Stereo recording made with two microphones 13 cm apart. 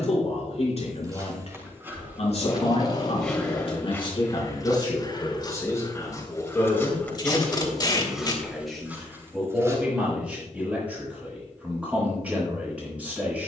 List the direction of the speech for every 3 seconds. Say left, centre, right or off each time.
left, left, centre, centre, centre.